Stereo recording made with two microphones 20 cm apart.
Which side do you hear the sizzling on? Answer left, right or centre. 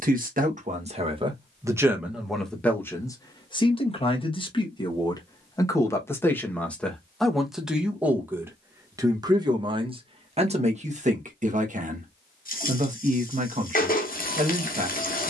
left.